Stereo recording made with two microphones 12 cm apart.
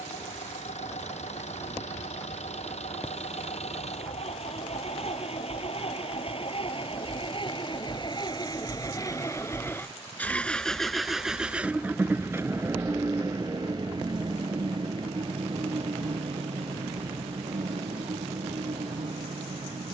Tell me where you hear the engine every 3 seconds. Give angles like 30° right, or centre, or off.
70° left, 60° left, 40° left, 10° left, 30° right, 50° right, 60° right.